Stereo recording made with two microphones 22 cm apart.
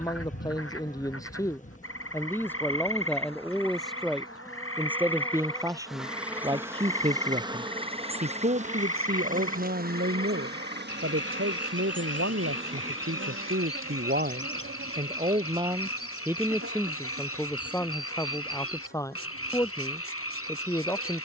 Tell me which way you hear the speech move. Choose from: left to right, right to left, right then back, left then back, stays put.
right then back.